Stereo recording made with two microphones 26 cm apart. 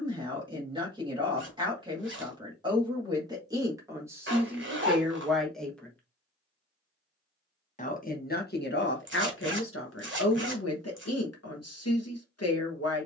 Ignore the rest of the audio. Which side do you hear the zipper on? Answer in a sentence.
In this clip you hear the zipper on the right.